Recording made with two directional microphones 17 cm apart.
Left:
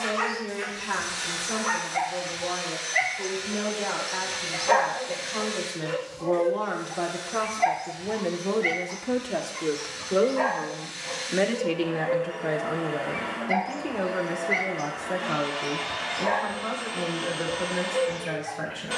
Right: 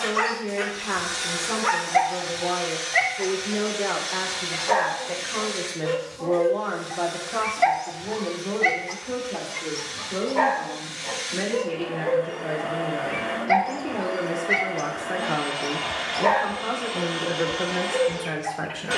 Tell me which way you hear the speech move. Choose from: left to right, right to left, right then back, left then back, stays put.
left then back.